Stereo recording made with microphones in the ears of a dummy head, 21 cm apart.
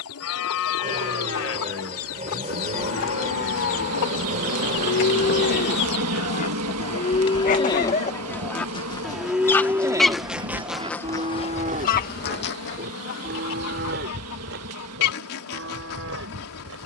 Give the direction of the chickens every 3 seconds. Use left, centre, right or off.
left, left, left, centre, left, left.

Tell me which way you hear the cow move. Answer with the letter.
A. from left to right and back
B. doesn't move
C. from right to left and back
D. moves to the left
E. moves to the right
E.